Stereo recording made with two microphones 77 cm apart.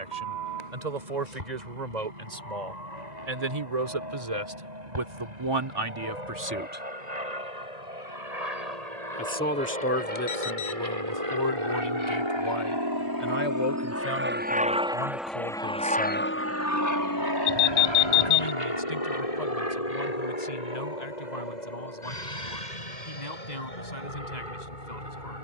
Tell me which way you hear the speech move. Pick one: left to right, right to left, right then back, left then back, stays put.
right to left.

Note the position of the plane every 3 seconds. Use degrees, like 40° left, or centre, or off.
70° right, 70° right, 60° right, 50° right, 20° right, 20° left, 50° left, 60° left, 70° left.